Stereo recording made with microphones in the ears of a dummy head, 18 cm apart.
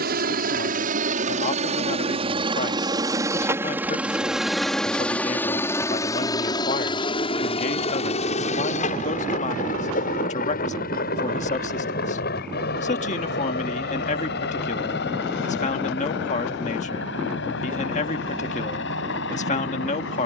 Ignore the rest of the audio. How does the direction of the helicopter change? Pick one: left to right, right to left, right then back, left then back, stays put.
right to left.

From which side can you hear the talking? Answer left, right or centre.
left.